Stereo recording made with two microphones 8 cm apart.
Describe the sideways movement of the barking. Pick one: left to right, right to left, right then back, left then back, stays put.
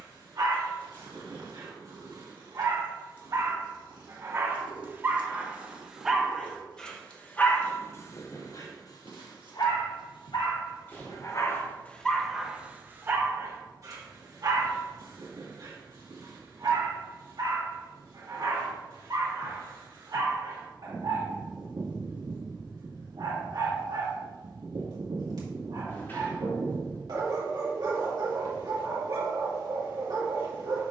left then back.